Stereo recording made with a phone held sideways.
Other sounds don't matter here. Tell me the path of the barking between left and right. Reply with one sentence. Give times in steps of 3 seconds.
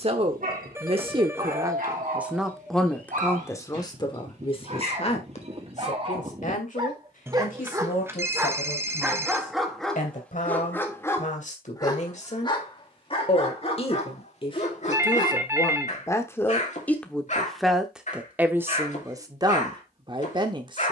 You can hear the barking on the right from 0 s, in the centre from 9 s and on the left from 12 s.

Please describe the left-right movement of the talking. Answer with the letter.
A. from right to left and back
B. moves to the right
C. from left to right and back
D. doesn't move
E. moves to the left
A.